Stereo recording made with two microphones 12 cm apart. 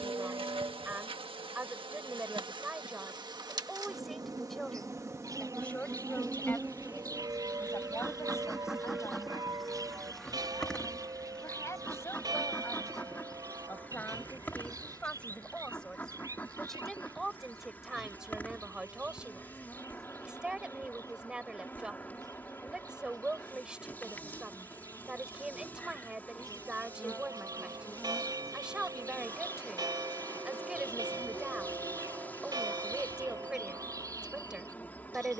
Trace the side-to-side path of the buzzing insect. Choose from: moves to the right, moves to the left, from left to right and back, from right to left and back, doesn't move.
moves to the left.